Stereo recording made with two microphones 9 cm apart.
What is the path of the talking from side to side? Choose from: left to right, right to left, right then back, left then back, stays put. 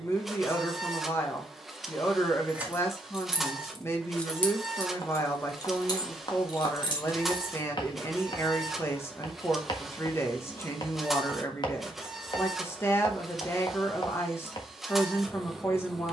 stays put.